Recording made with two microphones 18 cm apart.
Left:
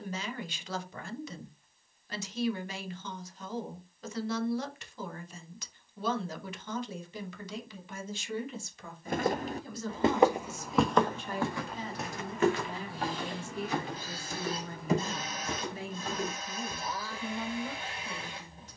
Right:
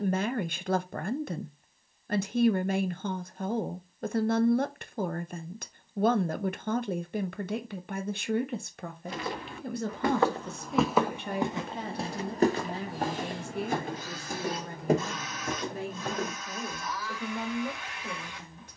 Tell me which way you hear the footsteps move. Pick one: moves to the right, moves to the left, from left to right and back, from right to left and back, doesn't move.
moves to the right.